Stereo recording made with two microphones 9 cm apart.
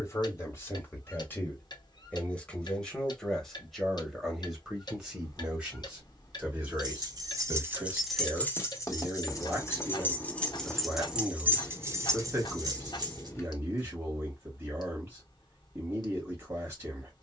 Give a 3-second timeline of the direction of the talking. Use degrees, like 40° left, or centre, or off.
20° left, 10° right, 30° right, 30° right, 30° right, 30° right.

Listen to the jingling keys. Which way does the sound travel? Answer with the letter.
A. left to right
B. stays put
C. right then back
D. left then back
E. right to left
D.